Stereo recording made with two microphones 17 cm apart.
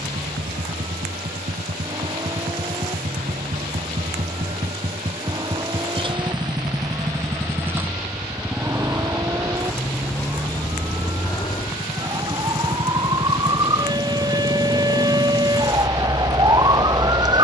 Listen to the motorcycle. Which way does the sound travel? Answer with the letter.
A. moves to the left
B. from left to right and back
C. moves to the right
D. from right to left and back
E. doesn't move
A.